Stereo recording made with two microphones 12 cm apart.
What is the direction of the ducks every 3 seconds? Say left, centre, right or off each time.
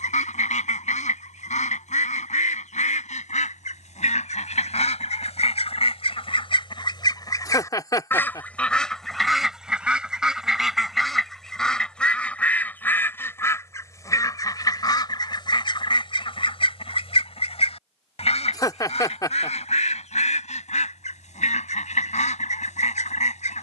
left, left, left, centre, left, left, left, left.